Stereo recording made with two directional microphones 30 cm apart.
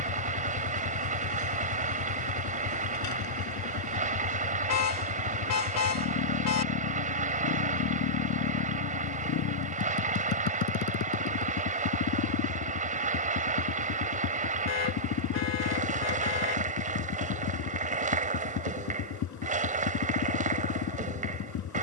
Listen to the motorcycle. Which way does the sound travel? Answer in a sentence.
In this clip you hear the motorcycle stay put.